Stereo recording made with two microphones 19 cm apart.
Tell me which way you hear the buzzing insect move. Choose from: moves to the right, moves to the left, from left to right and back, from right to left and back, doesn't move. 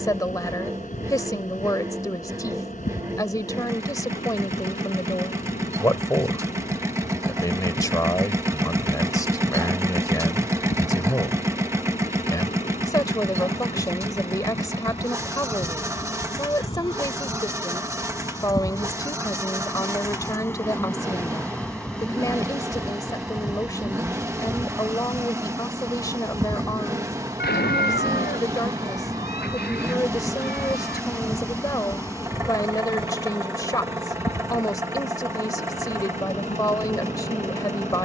from left to right and back.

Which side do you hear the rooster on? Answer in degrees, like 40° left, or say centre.
60° left.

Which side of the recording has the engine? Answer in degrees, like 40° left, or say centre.
10° right.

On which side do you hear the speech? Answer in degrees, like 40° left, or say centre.
20° left.